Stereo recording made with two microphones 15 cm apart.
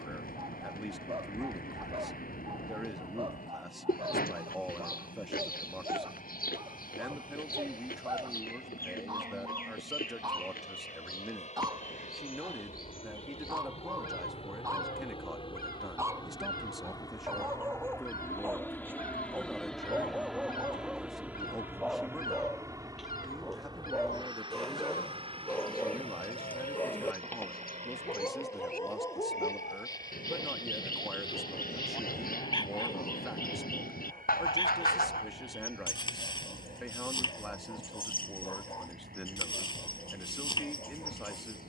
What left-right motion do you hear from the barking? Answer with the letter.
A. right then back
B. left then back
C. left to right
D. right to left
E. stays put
D.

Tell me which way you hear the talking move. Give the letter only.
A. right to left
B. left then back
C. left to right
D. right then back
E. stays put
E.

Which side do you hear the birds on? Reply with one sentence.
In this clip you hear the birds on the left.